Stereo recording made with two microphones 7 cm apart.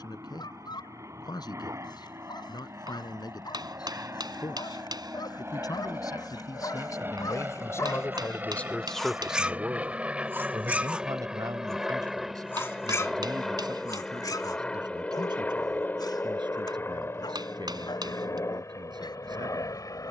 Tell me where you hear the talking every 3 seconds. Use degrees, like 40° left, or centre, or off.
70° left, 70° left, 40° left, 40° right, 80° right, 80° right, 80° right.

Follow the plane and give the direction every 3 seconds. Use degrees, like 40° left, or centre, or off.
50° right, 40° right, 30° right, 10° right, 10° left, 30° left, 40° left.